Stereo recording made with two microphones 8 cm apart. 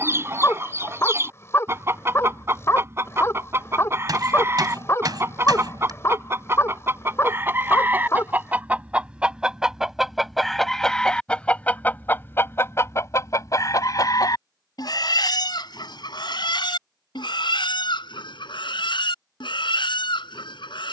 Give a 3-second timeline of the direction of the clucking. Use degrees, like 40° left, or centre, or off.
30° right, 30° right, 30° right, centre, 40° left, 70° left, 80° left.